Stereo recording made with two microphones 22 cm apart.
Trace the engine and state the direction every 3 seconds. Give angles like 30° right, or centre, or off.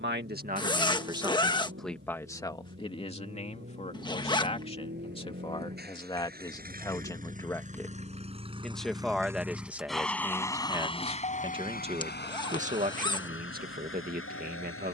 60° right, 50° right, 30° right, 10° left, 60° left.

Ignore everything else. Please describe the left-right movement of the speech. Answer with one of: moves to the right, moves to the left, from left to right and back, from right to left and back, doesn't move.
from right to left and back.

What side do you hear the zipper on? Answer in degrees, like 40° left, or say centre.
20° left.